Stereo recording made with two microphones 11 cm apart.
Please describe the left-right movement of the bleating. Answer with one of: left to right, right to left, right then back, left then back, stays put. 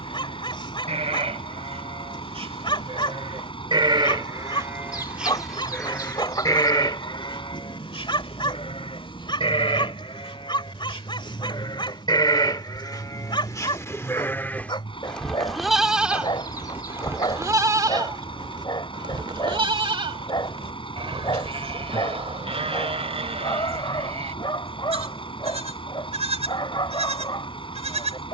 left then back.